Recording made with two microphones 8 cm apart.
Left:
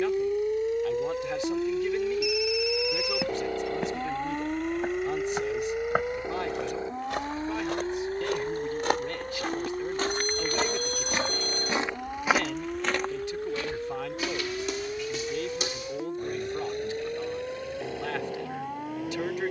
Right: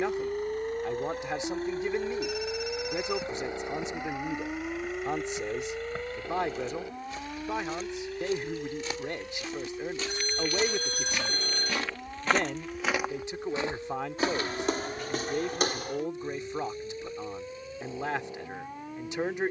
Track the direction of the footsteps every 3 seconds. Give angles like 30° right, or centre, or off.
off, 80° left, 70° left, 40° left, 20° right, 50° right, off.